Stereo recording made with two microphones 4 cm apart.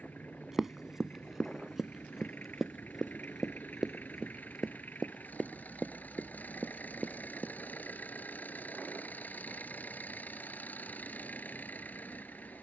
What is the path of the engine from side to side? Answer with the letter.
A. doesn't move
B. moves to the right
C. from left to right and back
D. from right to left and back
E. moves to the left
A.